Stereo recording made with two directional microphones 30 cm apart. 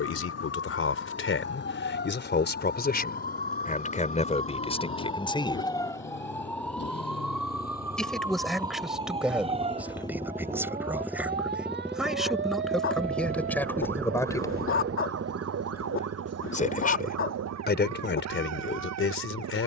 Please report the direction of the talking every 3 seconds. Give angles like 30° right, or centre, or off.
40° left, 20° left, centre, centre, centre, 30° left, 40° left.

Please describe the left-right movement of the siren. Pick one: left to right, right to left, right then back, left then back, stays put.
left to right.